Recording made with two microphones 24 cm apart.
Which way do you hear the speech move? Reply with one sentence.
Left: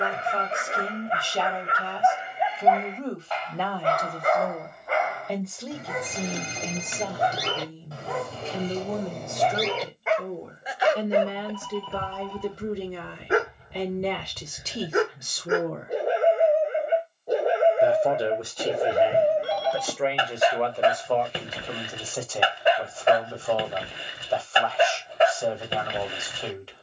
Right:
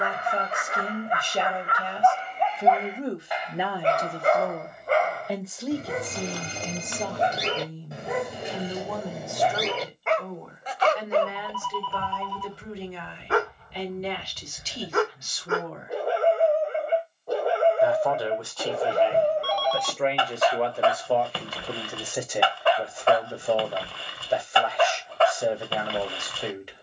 You can hear the speech go left and come back.